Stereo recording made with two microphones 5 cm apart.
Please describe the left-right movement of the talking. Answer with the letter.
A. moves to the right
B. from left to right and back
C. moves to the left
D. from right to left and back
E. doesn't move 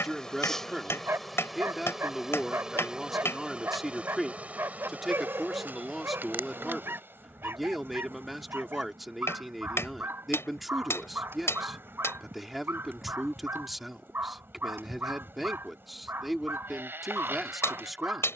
E.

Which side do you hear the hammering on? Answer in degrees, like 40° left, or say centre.
60° left.